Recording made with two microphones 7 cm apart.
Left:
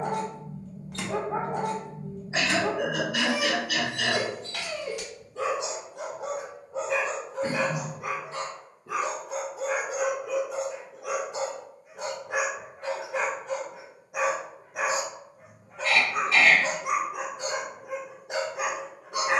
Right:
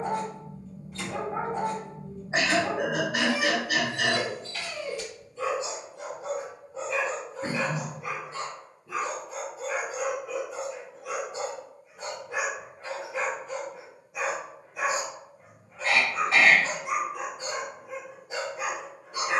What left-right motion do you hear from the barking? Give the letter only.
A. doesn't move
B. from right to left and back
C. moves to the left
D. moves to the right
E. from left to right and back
A.